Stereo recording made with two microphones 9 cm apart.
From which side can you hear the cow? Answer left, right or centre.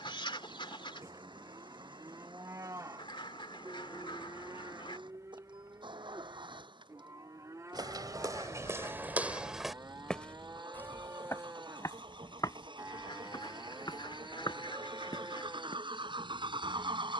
right.